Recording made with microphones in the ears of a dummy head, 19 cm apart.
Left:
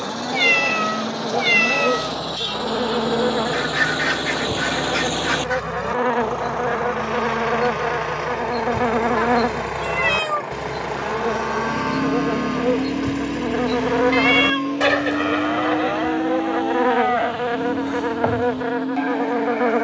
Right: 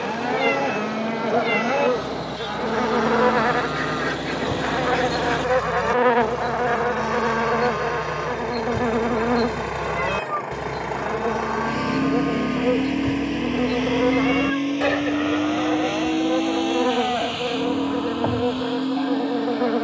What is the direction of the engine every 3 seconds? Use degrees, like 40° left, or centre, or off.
60° left, 50° left, 30° left, 10° left, 20° right, 40° right, 50° right.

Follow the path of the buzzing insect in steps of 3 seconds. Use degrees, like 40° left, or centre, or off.
60° right, 30° right, 10° left, 40° left, 60° left, 60° left, 60° left.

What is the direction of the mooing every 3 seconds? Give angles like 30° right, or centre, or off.
40° right, 30° right, 10° right, 10° left, 40° left, 50° left, 60° left.